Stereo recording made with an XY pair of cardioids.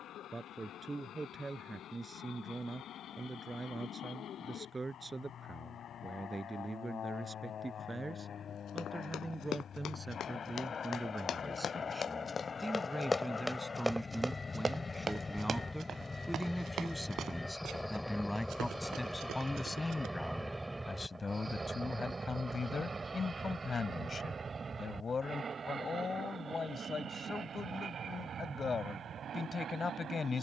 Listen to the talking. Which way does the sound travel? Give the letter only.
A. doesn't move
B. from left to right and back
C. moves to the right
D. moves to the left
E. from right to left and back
D.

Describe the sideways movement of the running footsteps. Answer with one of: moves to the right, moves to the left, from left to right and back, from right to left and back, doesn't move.
moves to the right.